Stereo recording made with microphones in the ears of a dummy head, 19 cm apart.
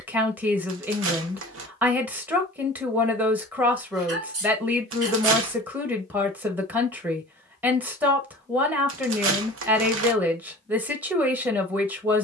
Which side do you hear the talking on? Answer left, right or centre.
centre.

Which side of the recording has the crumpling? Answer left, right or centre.
right.